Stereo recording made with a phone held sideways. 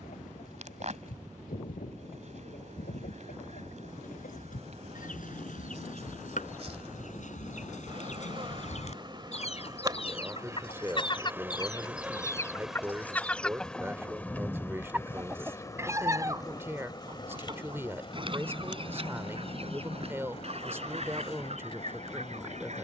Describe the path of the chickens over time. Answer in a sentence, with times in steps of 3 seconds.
You can hear the chickens on the left from 0 s, in the centre from 12 s and on the right from 15 s.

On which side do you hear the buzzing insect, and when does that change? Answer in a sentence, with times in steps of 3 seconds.
You can hear the buzzing insect on the right from 0 s, in the centre from 12 s and on the left from 15 s.